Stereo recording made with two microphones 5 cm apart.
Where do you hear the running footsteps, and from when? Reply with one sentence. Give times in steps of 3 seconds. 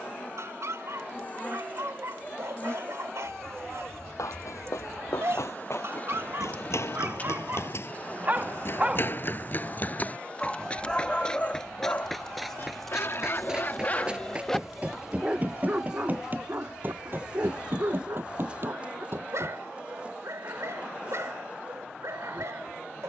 You can hear the running footsteps not at all from 0 s, on the left from 3 s, in the centre from 12 s, on the right from 15 s and not at all from 21 s.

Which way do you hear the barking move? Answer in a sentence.
In this clip you hear the barking go left and come back.